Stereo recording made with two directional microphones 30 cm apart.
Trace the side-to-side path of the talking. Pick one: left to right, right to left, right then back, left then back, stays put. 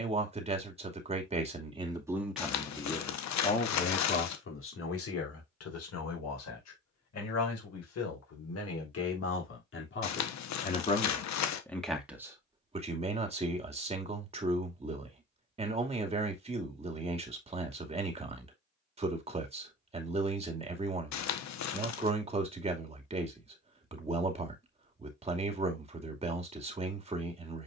left then back.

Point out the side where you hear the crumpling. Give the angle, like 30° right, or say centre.
60° left.